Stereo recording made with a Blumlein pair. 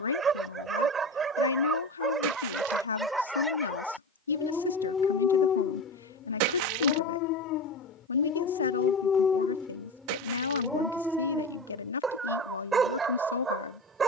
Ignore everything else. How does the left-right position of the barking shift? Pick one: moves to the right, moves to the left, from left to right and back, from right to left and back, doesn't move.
from right to left and back.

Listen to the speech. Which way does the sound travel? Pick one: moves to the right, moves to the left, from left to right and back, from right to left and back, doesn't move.
doesn't move.